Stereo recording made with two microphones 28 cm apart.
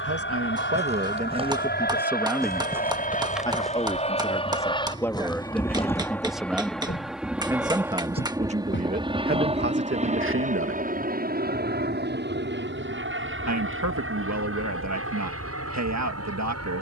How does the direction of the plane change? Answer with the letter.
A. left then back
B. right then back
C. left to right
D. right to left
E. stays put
C.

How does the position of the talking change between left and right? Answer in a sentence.
In this clip you hear the talking move from right to left and back again.